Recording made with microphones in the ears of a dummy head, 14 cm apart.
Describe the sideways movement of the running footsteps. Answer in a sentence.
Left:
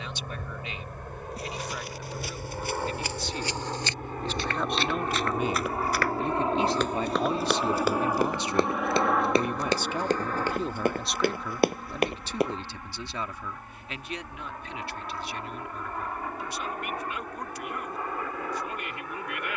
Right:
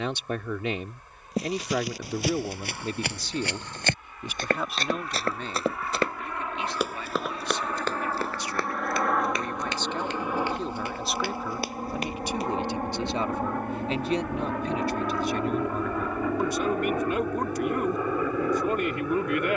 You can hear the running footsteps travel towards the left.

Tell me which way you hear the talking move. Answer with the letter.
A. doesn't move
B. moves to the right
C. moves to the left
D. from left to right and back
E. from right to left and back
E.